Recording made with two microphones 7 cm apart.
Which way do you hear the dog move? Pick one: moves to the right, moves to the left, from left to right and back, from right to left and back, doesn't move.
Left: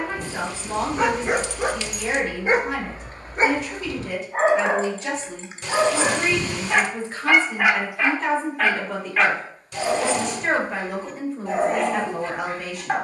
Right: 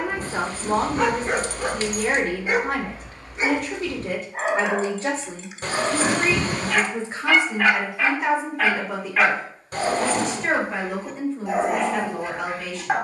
from right to left and back.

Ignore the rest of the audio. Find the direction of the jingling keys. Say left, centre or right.
right.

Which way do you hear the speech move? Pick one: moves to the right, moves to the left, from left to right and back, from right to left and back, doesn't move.
moves to the left.